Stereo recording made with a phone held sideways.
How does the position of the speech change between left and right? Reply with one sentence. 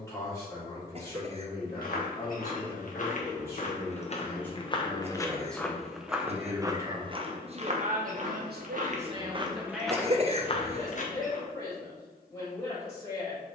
You can hear the speech go right and come back.